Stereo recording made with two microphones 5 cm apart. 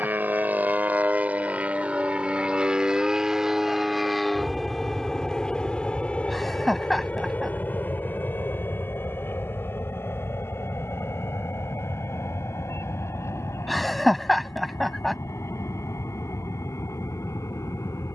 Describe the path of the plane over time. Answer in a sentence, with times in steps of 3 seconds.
You can hear the plane on the right from 0 s, in the centre from 3 s and on the left from 6 s.